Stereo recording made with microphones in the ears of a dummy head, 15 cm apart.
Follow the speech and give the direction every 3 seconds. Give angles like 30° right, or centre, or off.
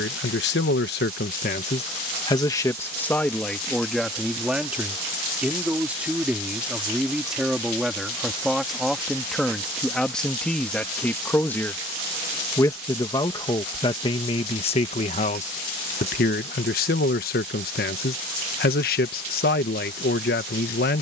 50° left, centre, centre, 10° left, 30° left, 60° left, 60° left.